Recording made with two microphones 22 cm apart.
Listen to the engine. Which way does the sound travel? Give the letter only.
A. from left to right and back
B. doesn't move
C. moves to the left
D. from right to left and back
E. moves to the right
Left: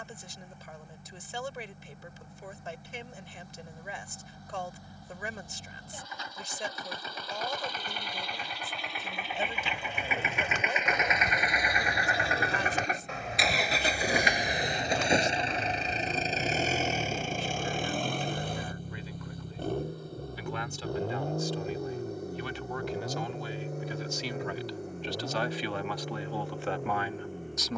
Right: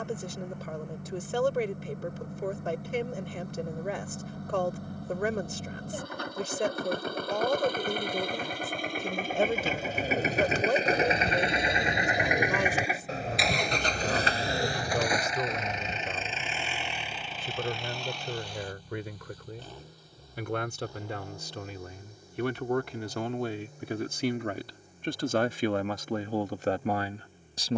C.